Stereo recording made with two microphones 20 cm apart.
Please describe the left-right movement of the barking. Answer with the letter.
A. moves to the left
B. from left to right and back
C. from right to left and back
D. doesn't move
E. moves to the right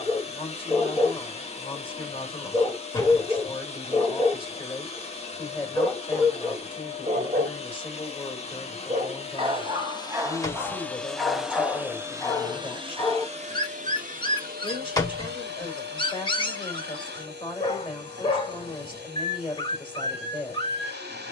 B.